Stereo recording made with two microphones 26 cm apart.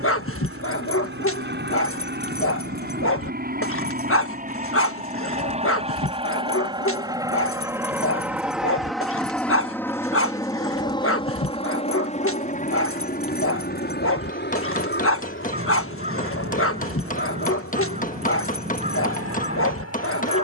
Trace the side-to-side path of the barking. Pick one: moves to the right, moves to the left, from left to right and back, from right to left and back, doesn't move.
doesn't move.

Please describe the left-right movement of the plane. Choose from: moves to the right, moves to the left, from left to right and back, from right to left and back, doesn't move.
moves to the left.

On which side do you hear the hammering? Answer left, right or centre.
left.